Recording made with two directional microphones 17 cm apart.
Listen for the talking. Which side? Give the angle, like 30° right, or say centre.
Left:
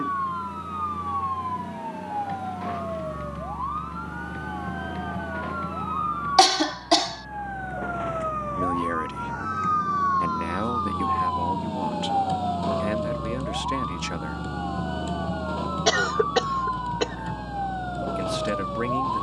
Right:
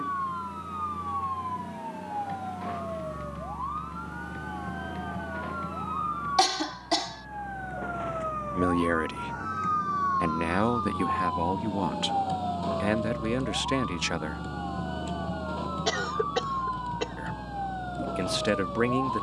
20° right.